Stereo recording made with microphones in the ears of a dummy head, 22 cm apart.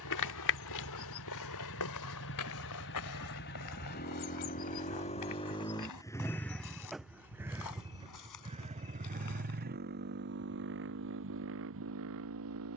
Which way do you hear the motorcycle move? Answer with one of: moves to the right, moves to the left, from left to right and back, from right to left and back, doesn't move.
moves to the right.